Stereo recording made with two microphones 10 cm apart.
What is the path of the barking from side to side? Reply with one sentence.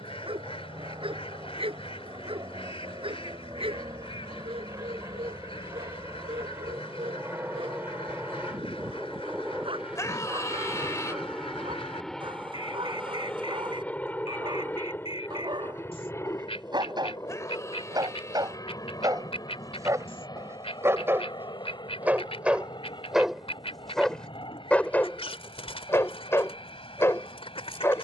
In this clip you hear the barking move from right to left.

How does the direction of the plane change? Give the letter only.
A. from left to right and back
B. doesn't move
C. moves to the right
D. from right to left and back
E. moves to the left
E.